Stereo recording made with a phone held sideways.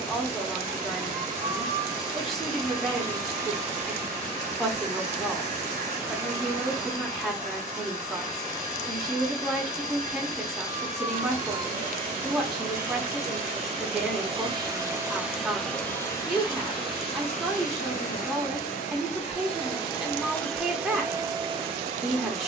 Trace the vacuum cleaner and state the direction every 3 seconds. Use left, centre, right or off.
right, right, right, right, right, left, left, right.